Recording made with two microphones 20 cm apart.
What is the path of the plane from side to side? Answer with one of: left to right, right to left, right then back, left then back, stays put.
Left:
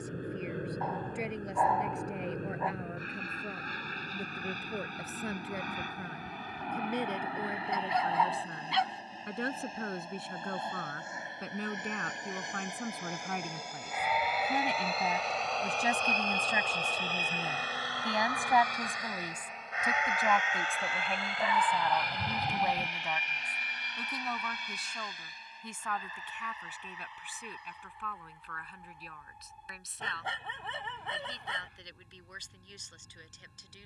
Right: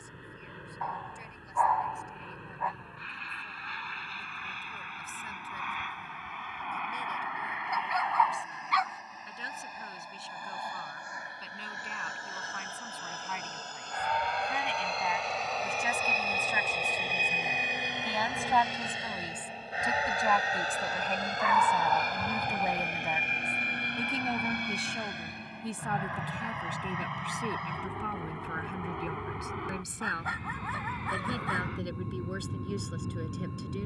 left to right.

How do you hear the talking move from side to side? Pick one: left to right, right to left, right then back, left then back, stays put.
left to right.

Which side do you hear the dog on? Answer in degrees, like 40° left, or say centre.
30° left.